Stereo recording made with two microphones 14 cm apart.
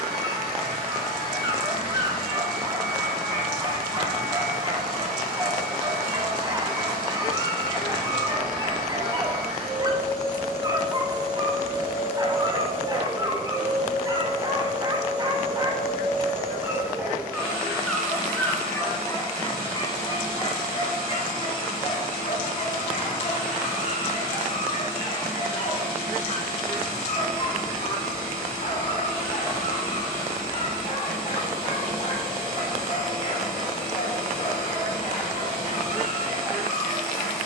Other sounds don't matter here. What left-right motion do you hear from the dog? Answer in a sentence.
In this clip you hear the dog travel towards the left.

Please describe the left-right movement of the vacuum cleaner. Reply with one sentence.
In this clip you hear the vacuum cleaner stay in one place.